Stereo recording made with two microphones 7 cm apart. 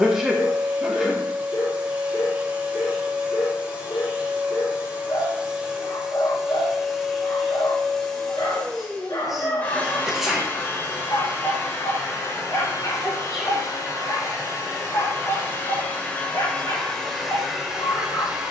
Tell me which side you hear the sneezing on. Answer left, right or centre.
centre.